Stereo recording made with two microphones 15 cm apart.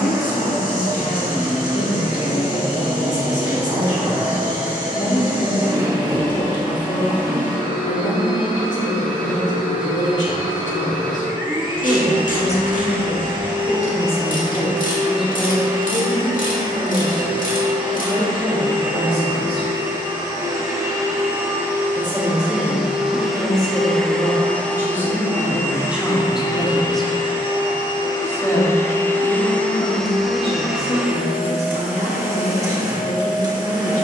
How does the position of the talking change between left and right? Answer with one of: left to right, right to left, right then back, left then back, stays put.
right then back.